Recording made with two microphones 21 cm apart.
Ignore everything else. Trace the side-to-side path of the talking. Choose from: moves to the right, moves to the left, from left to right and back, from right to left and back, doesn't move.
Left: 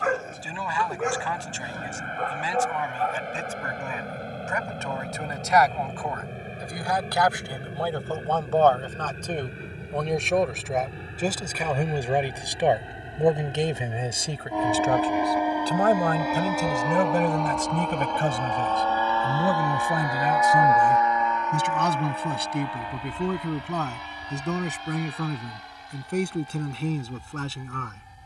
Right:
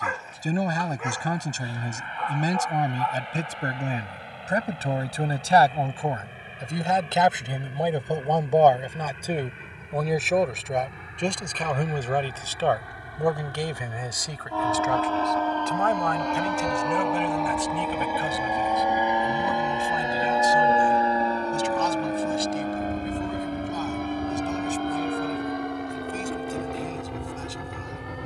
moves to the left.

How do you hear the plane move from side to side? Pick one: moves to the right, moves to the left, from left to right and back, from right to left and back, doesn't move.
moves to the right.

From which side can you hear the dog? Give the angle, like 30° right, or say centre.
50° left.